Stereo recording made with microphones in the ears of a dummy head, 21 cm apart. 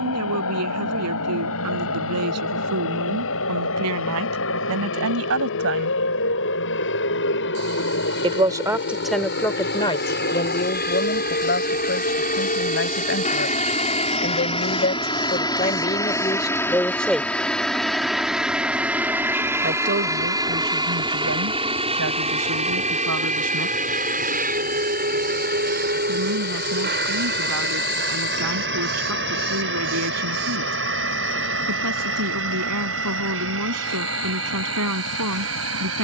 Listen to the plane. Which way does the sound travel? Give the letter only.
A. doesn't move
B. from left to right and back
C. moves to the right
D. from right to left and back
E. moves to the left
C.